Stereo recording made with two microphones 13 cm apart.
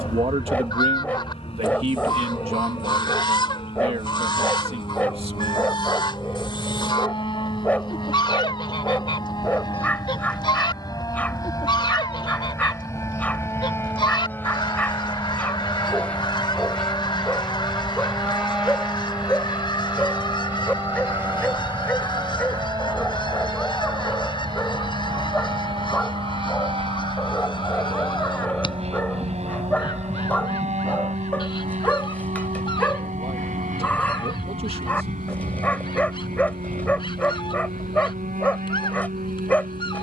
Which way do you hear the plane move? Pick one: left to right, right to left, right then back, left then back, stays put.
left to right.